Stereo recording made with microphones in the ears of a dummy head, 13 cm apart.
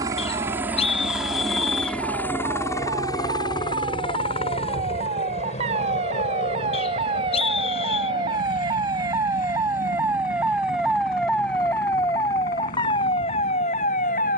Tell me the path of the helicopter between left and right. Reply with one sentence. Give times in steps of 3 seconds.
In this clip you hear the helicopter in the centre from 0 s and on the left from 3 s.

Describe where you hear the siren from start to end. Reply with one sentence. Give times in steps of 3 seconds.
In this clip you hear the siren on the right from 0 s, in the centre from 9 s and on the left from 12 s.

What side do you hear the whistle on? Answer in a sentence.
You can hear the whistle on the left.